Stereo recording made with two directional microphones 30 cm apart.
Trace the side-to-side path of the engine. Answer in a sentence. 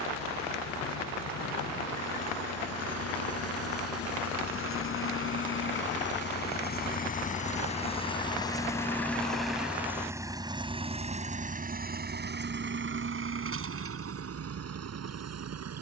You can hear the engine travel towards the right.